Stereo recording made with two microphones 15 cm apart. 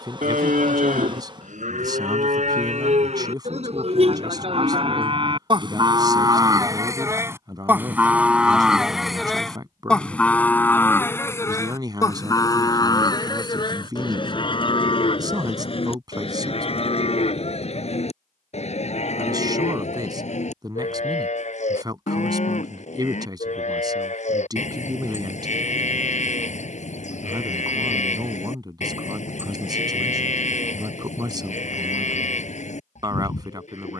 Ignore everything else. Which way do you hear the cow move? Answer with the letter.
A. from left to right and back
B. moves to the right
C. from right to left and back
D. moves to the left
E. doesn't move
D.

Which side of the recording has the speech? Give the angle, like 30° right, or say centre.
30° right.